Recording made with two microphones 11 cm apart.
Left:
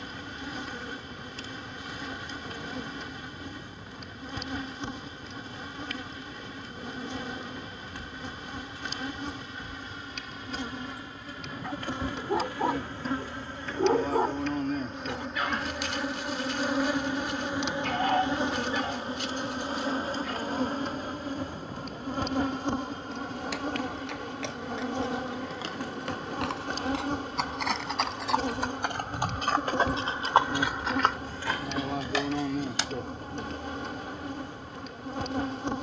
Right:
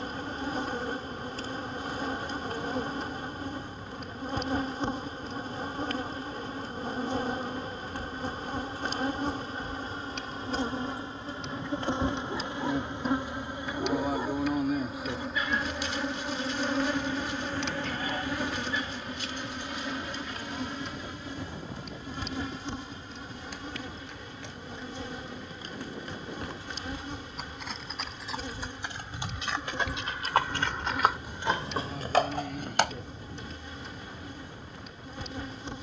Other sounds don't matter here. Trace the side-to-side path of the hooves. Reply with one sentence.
You can hear the hooves move from left to right.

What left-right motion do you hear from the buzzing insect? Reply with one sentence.
In this clip you hear the buzzing insect move from right to left.